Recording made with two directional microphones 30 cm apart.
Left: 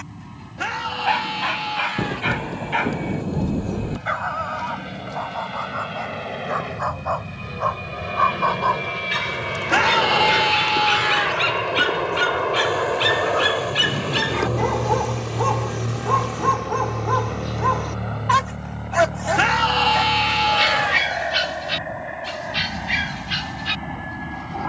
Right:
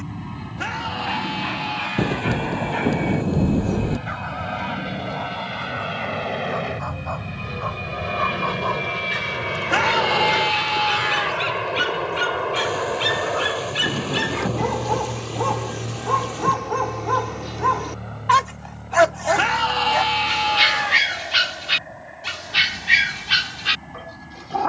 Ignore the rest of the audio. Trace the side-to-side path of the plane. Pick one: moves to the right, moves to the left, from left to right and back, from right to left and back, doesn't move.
moves to the left.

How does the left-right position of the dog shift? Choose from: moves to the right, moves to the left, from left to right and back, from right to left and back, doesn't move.
moves to the right.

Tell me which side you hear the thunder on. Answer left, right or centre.
right.